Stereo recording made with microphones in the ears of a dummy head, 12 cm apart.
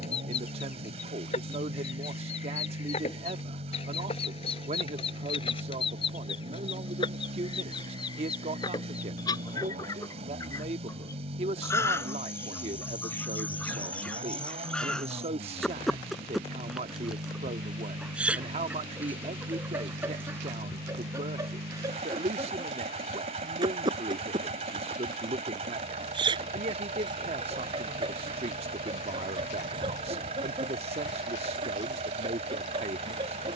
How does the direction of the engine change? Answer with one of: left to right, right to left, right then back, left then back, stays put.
stays put.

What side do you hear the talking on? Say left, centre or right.
right.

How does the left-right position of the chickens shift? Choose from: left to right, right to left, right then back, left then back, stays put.
left to right.